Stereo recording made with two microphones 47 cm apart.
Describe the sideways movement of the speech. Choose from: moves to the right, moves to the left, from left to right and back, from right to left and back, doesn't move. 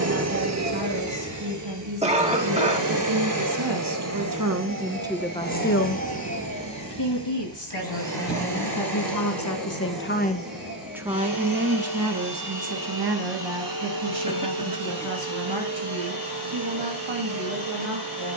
from right to left and back.